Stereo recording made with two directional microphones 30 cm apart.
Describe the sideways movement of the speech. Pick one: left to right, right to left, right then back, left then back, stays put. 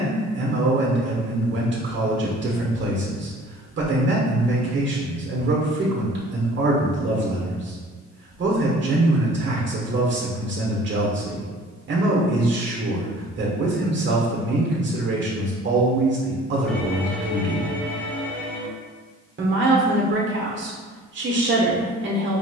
stays put.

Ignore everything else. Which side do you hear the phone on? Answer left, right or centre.
centre.